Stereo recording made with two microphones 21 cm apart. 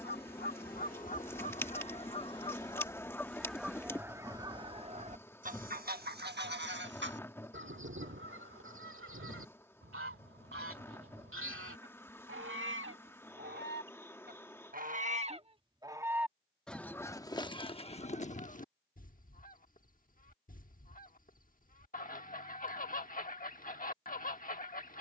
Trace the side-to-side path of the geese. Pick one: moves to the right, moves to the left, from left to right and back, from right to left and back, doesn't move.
from left to right and back.